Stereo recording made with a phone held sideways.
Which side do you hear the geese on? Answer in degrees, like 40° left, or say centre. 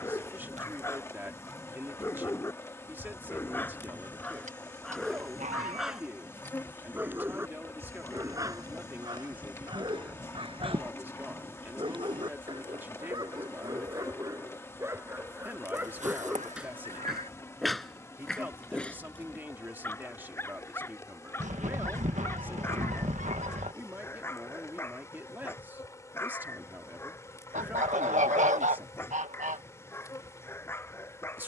60° right.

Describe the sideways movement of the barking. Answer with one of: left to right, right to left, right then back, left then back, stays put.
right then back.